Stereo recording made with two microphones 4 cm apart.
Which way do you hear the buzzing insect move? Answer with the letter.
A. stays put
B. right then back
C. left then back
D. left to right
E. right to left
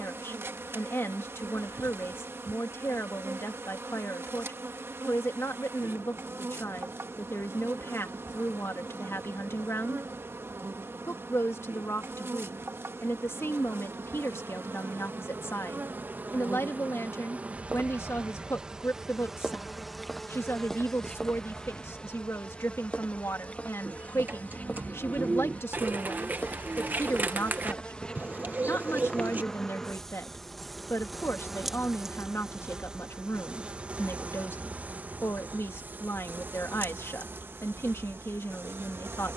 C.